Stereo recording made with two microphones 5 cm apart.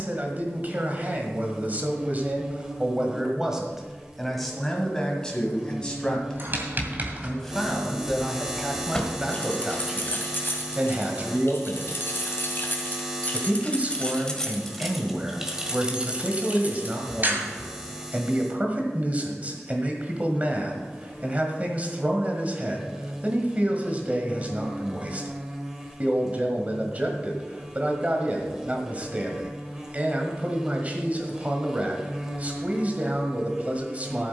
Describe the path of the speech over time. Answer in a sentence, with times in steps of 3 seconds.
In this clip you hear the speech on the right from 0 s, in the centre from 3 s and on the right from 9 s.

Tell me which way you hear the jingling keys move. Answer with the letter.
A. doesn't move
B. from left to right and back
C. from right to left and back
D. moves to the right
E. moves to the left
C.